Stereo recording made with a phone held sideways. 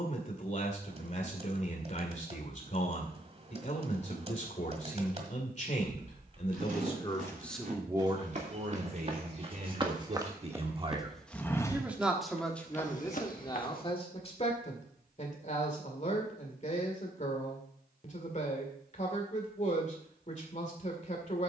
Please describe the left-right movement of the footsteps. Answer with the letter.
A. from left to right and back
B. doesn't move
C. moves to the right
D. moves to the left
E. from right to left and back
D.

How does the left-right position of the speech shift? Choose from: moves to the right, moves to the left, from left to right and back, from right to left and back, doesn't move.
from left to right and back.